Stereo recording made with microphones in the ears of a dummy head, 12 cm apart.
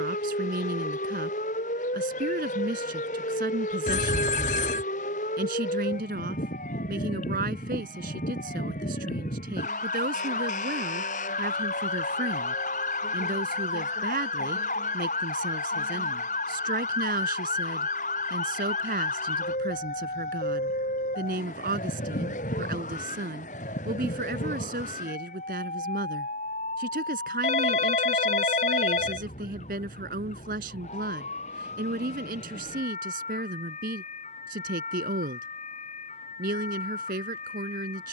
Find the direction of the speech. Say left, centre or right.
right.